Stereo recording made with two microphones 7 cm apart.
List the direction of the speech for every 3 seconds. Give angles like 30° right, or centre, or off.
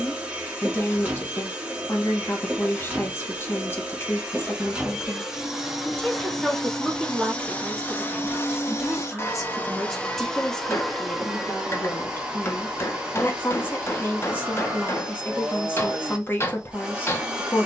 30° left, 30° left, centre, 10° left, 30° left, 30° left.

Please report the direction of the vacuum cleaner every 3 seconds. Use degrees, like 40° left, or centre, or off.
20° right, 10° right, 20° left, 10° left, 10° right, 10° right.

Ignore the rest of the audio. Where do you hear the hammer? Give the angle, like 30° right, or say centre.
30° left.